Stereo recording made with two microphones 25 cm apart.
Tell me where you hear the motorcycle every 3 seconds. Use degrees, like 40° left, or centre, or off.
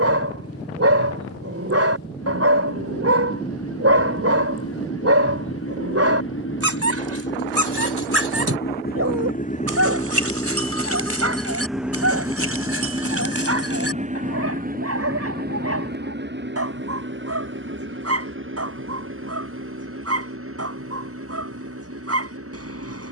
80° left, 70° left, 50° left, 20° left, 20° right, 40° right, 50° right, 60° right.